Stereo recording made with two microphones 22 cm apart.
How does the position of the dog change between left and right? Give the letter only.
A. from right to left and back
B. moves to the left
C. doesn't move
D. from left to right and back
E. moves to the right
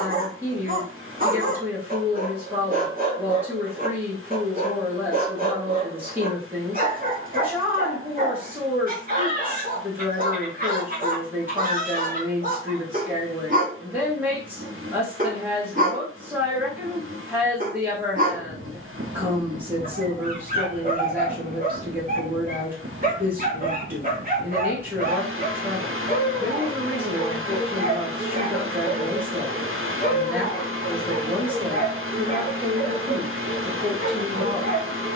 C.